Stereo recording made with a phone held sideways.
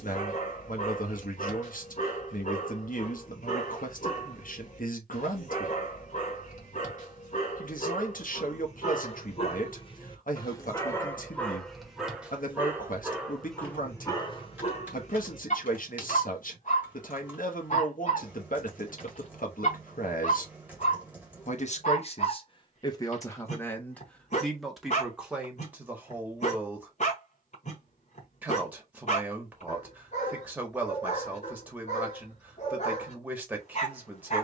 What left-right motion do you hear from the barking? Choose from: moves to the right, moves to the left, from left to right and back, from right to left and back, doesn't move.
from left to right and back.